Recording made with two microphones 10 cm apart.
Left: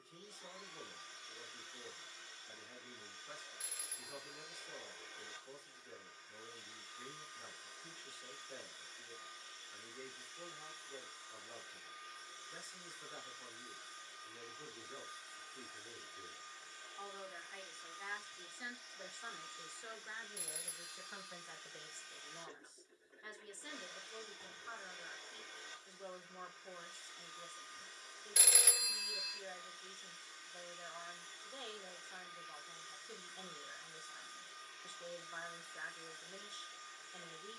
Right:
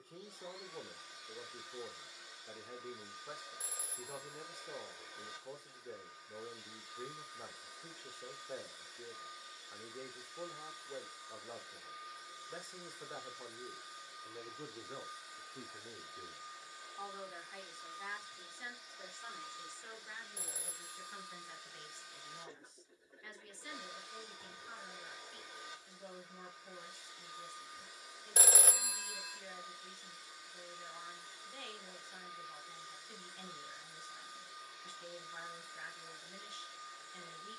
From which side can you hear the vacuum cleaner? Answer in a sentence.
You can hear the vacuum cleaner in the centre.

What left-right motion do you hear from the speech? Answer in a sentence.
You can hear the speech move to the left.